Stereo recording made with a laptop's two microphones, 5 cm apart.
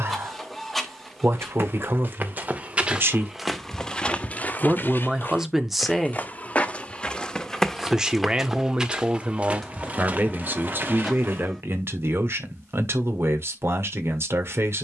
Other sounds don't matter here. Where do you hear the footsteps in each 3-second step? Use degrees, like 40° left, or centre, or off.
40° right, 20° left, 10° left, 30° right, off.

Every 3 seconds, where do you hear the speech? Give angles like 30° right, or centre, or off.
60° right, 20° right, 10° right, 40° right, 60° right.